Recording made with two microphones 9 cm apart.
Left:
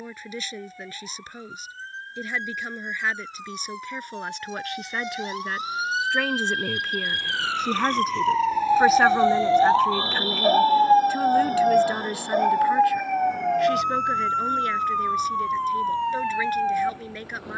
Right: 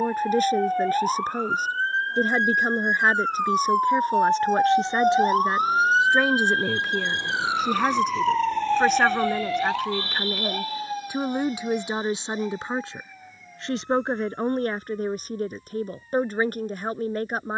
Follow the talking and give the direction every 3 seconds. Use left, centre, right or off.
right, right, centre, centre, right, right.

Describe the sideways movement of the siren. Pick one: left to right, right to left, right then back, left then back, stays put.
right to left.